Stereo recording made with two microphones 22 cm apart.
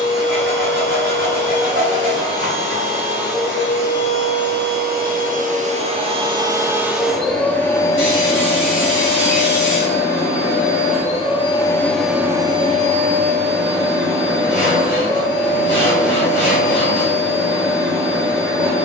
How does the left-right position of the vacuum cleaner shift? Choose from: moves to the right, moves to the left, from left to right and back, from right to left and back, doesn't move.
from right to left and back.